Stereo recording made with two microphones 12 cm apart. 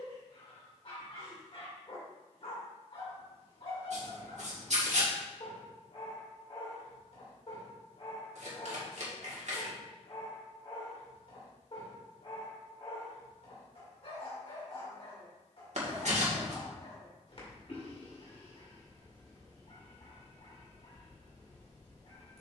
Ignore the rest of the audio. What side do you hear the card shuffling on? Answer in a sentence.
You can hear the card shuffling on the right.